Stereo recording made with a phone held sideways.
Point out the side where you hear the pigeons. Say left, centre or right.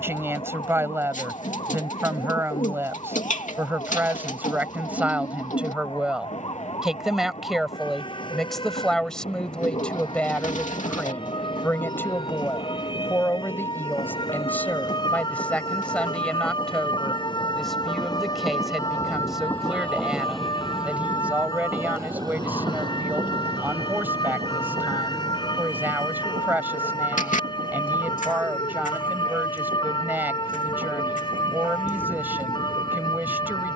left.